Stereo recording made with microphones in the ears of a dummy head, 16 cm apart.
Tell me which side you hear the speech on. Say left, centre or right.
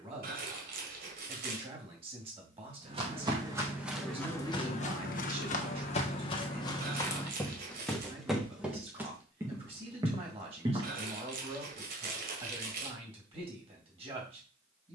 right.